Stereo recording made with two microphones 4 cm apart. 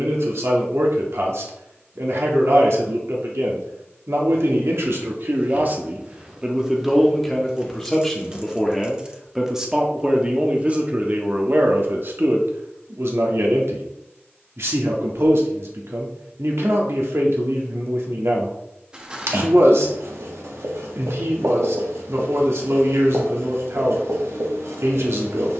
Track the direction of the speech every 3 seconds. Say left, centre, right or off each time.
right, right, centre, right, right, right, right, right, right.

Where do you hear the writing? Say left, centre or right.
right.